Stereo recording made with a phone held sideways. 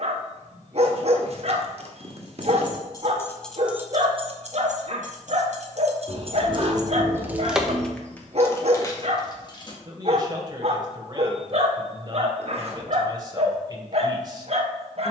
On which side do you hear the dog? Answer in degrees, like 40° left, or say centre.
50° right.